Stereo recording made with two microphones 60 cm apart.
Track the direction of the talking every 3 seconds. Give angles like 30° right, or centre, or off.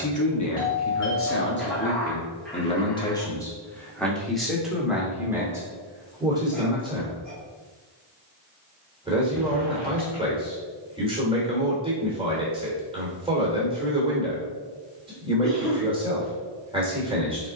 20° left, centre, 10° right, 10° right, 10° right, 10° right.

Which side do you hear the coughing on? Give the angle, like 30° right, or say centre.
centre.